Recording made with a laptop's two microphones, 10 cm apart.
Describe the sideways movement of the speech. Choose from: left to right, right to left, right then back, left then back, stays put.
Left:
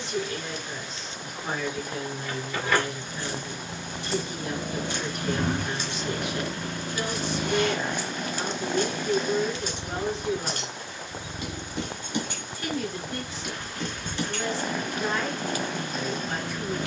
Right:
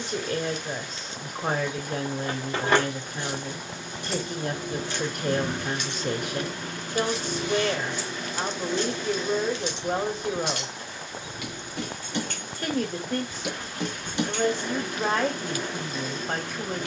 stays put.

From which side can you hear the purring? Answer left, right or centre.
left.